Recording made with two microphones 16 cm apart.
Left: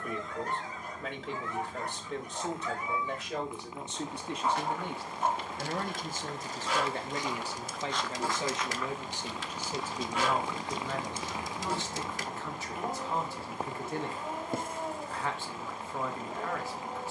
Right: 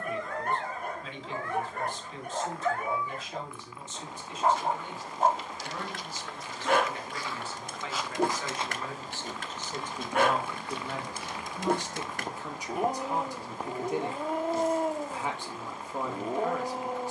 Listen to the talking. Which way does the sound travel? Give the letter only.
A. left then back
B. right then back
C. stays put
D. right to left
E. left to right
E.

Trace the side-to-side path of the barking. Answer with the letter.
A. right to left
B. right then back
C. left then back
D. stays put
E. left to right
D.